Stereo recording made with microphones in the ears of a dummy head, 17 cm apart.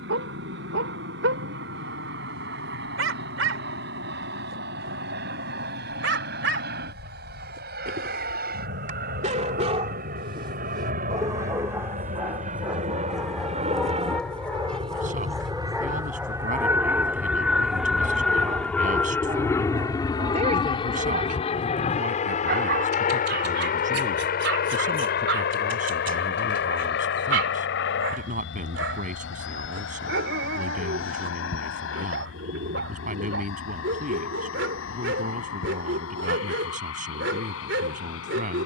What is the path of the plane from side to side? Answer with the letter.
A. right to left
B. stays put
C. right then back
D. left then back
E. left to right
A.